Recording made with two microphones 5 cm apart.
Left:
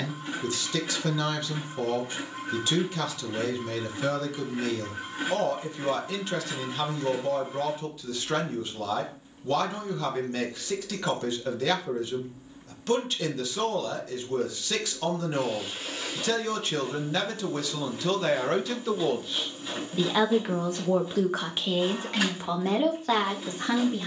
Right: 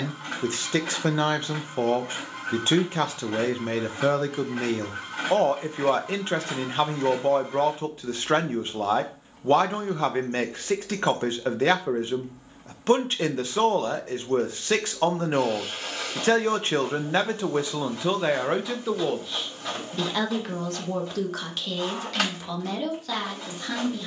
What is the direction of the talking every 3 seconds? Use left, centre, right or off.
right, right, right, right, right, right, centre, left.